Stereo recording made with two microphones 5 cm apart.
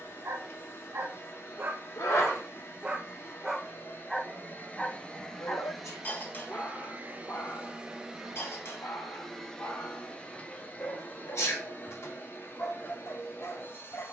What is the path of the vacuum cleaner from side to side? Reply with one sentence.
You can hear the vacuum cleaner move from left to right and back again.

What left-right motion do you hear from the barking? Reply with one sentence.
You can hear the barking go from the right side to the left.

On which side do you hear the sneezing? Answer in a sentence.
In this clip you hear the sneezing on the left.